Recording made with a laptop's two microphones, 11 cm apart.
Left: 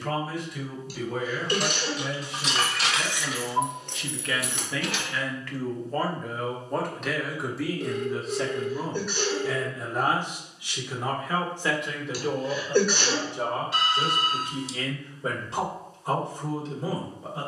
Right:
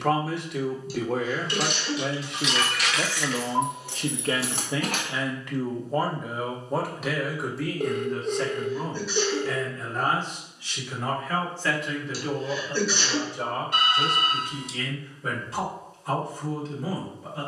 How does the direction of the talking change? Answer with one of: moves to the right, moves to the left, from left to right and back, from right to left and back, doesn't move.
moves to the left.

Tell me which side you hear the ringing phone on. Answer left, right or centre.
right.